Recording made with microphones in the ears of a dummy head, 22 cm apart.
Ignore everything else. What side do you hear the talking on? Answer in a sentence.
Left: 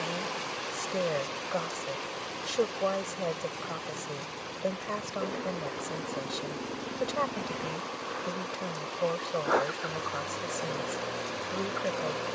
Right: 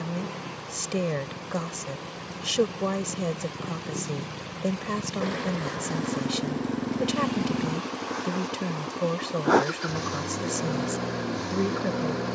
In this clip you hear the talking on the right.